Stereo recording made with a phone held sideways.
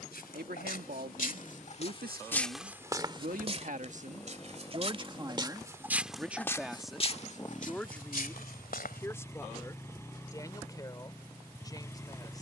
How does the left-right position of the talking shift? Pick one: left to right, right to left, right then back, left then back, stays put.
right to left.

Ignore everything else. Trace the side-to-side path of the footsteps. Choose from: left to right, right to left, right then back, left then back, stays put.
right then back.